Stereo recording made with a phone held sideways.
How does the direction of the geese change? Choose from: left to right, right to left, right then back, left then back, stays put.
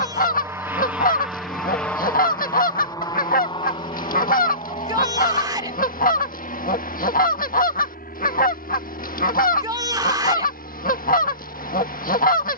stays put.